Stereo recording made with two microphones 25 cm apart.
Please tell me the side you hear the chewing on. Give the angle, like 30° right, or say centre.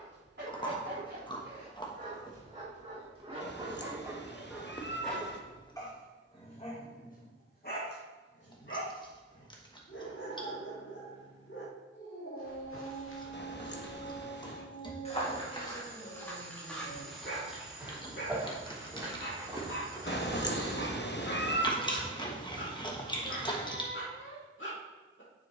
20° left.